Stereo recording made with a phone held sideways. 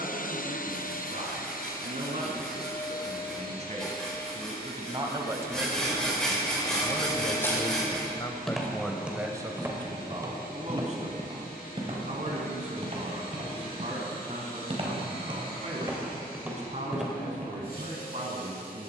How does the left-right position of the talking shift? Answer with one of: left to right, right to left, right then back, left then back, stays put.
left then back.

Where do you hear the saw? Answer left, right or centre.
centre.